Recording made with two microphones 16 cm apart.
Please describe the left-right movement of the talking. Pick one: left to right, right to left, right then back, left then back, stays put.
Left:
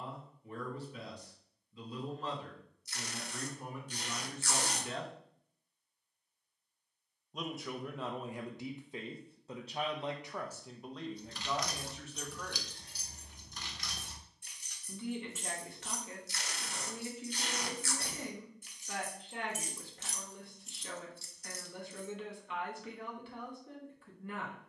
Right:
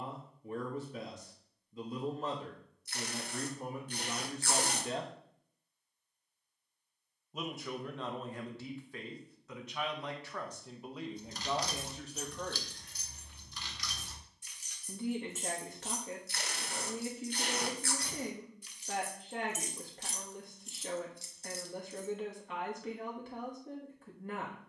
left then back.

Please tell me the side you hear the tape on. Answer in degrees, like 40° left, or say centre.
60° right.